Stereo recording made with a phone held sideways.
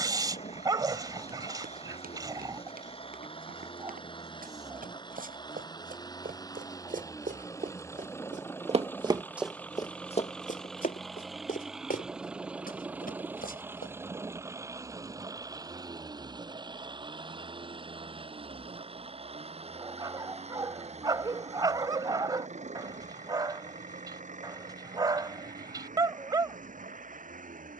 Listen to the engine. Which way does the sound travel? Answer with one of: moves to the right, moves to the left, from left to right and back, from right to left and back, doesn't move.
moves to the right.